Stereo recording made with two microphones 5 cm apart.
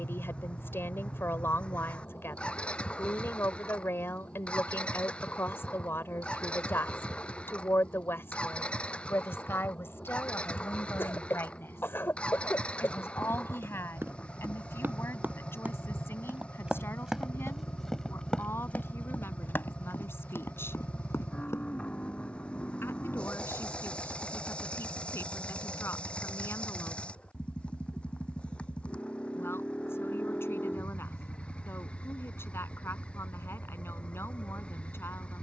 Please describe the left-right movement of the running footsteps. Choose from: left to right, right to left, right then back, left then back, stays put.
right to left.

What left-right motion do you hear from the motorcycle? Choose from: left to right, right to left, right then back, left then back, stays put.
stays put.